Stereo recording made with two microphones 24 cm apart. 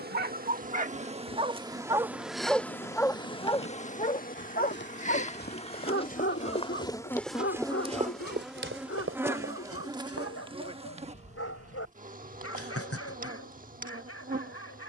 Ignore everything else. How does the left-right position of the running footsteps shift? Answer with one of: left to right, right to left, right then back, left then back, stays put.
left to right.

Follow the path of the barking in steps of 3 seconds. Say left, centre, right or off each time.
right, left, left, left, left.